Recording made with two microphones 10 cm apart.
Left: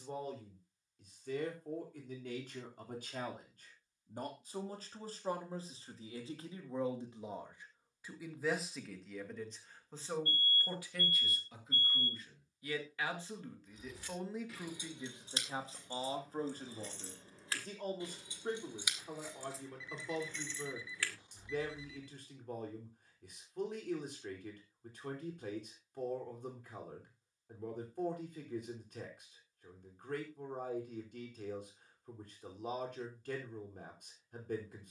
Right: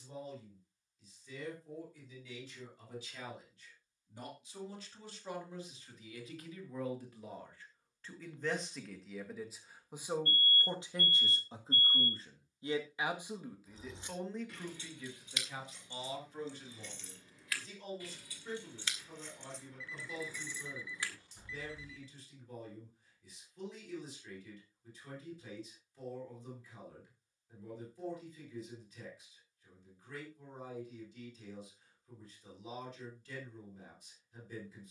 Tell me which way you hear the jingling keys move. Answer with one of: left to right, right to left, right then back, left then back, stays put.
left then back.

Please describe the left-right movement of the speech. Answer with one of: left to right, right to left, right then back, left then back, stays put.
right then back.